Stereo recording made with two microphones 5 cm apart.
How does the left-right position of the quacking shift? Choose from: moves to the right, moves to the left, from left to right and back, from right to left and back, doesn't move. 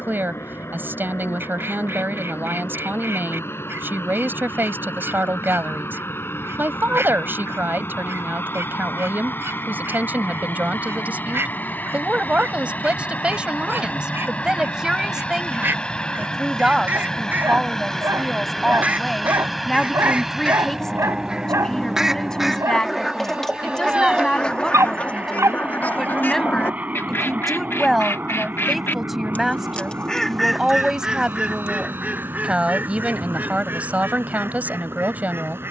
from right to left and back.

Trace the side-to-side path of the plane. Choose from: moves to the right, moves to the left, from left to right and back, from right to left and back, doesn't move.
moves to the right.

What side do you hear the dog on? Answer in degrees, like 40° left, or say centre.
80° right.